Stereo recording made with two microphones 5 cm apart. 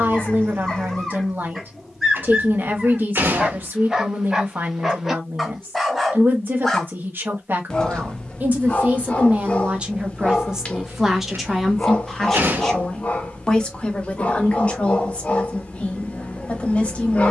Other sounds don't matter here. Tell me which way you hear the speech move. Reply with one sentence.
You can hear the speech move to the left.